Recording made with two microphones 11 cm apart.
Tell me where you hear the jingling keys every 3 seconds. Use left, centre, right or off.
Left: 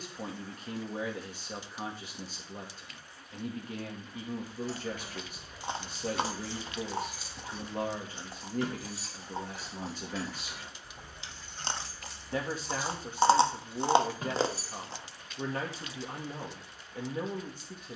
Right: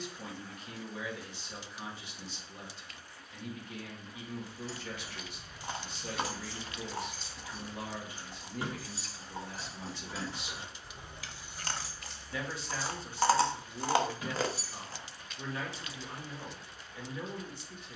off, left, centre, right, left, off.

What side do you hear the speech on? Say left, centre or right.
left.